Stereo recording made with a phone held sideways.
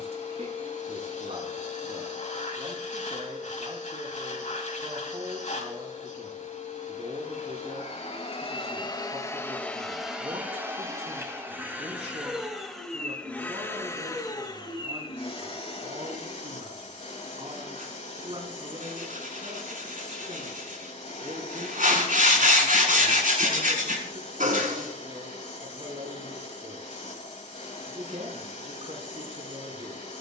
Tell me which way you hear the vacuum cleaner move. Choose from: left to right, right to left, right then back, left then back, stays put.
right then back.